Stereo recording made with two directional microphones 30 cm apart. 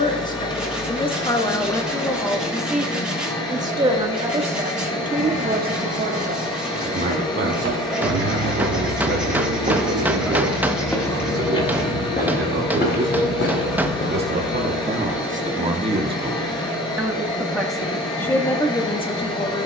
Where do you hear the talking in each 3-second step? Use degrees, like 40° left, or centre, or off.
10° left, 20° right, 40° right, 50° right, 40° right, 10° right, 10° left.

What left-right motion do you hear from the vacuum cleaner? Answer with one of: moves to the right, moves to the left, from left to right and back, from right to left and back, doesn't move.
doesn't move.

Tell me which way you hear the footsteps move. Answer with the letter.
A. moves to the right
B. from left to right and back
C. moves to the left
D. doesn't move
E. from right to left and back
C.